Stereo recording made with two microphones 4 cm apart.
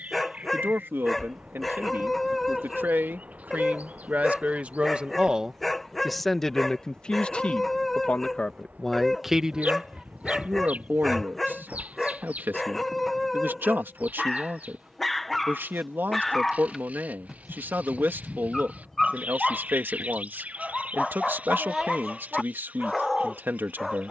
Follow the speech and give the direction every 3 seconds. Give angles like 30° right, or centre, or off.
60° right, 40° right, 20° left, 40° right, 50° right, 50° right, 50° right, 50° right.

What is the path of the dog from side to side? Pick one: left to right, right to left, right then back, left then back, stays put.
stays put.